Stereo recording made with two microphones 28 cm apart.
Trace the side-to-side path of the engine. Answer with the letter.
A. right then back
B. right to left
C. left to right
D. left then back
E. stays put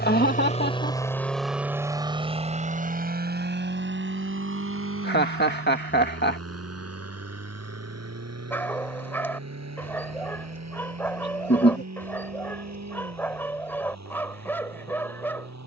C.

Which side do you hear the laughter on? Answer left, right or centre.
left.